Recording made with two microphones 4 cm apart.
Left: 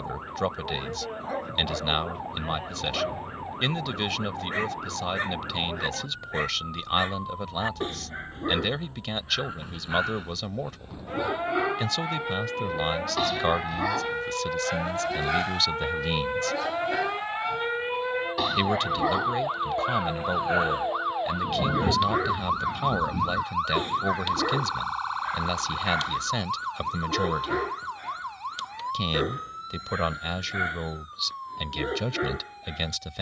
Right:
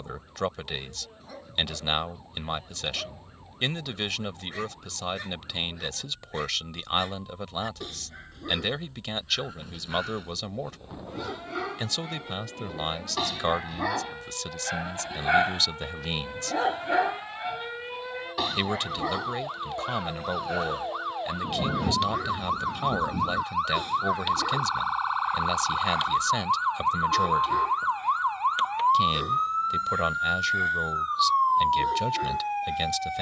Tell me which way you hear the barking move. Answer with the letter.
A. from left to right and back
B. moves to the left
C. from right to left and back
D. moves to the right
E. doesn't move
A.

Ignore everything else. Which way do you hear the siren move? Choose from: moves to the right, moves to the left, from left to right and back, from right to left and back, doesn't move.
moves to the right.